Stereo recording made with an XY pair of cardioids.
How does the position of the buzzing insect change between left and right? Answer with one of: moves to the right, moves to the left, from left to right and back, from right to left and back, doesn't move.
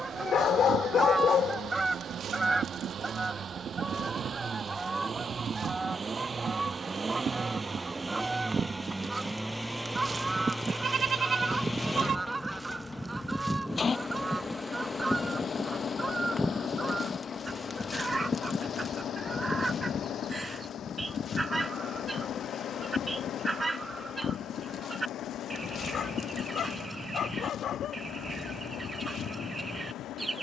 moves to the left.